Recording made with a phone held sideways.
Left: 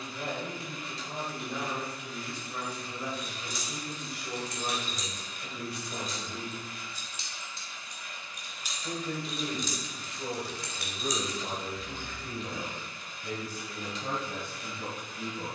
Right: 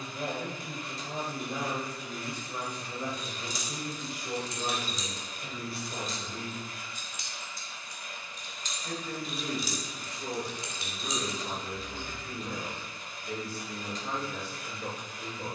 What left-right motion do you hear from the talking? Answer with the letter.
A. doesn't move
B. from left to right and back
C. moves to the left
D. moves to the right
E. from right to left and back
C.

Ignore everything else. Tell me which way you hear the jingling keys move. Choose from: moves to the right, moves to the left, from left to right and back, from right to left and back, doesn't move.
moves to the right.